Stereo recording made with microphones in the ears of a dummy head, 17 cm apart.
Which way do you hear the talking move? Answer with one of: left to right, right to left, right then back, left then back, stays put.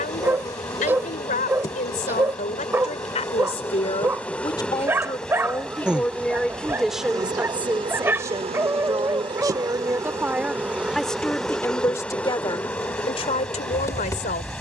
right then back.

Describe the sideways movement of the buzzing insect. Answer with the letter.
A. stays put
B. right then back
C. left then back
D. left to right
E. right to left
B.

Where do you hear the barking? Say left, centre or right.
centre.